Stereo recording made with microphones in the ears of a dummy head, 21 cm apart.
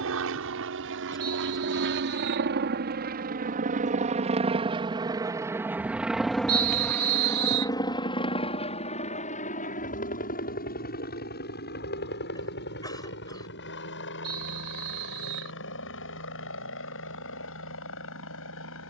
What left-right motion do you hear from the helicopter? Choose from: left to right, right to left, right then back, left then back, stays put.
right to left.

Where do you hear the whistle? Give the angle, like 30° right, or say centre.
50° right.